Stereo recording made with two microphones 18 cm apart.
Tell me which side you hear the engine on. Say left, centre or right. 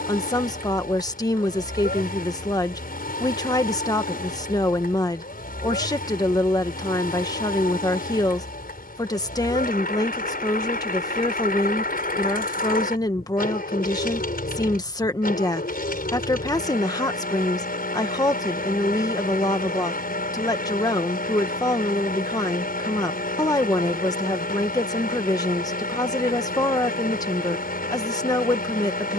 left.